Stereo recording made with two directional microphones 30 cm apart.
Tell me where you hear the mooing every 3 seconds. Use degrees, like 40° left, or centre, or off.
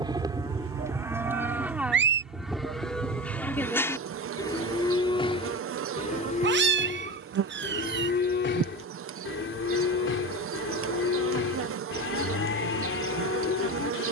10° right, 10° left, 30° left, 50° left, 50° left.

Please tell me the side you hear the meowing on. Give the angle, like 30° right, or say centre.
40° right.